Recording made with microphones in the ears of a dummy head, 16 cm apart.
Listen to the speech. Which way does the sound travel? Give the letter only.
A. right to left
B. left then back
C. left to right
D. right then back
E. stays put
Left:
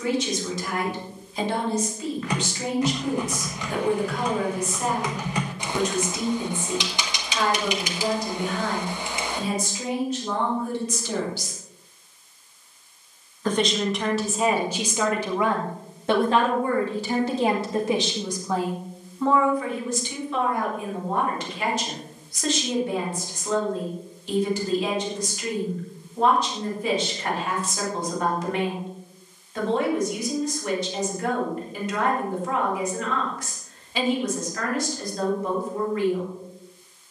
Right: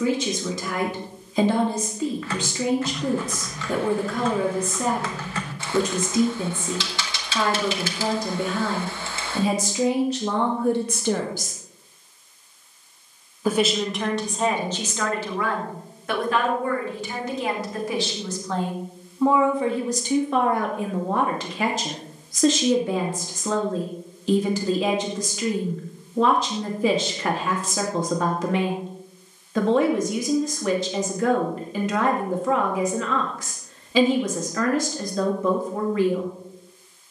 B.